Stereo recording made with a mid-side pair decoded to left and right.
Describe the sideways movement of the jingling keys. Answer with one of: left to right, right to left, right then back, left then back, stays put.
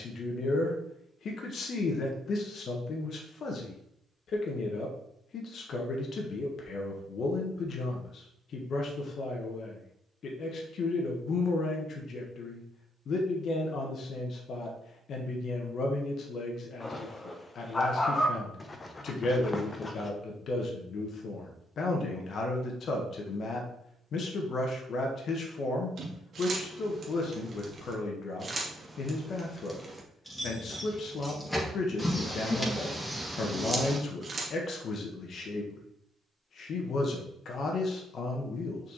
left then back.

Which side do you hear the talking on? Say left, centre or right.
left.